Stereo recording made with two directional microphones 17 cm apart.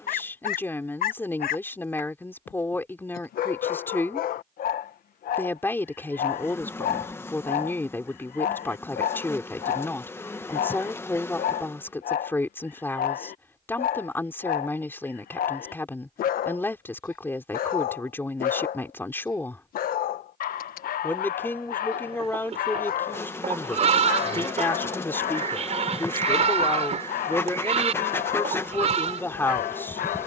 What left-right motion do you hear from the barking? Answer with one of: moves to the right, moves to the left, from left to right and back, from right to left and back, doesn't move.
doesn't move.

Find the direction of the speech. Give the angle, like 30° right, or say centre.
10° left.